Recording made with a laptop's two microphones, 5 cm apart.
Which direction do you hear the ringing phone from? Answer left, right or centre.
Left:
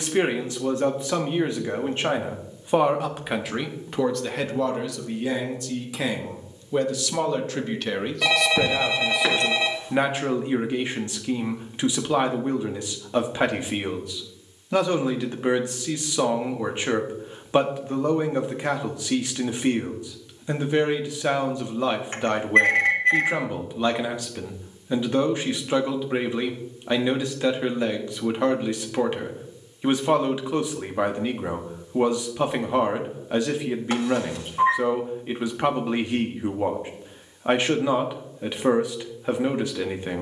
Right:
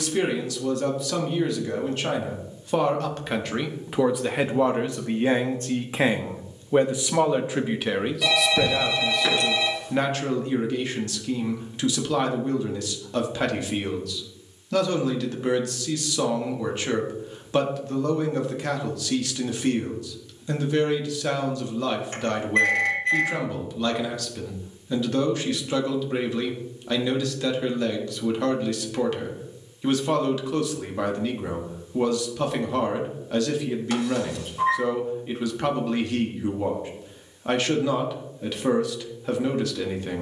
left.